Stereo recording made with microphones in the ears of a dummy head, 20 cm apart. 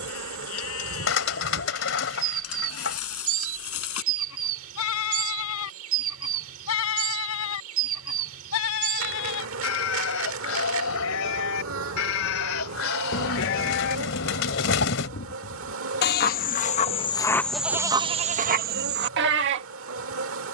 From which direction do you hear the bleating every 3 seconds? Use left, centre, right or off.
left, left, left, left, left, left, right.